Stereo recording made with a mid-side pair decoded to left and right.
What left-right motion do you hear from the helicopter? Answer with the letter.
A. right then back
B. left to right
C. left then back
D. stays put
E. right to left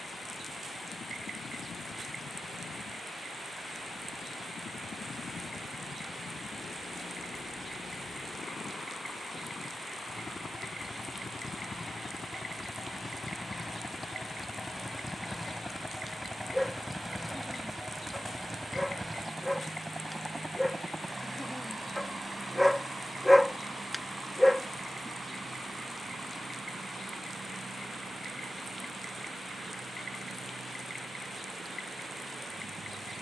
B.